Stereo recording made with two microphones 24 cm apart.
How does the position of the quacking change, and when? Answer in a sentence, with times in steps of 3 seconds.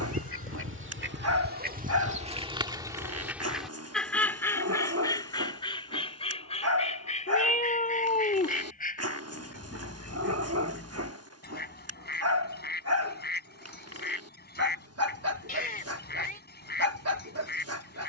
In this clip you hear the quacking on the right from 0 s, in the centre from 3 s and on the left from 6 s.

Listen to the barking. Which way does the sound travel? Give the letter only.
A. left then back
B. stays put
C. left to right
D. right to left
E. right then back
B.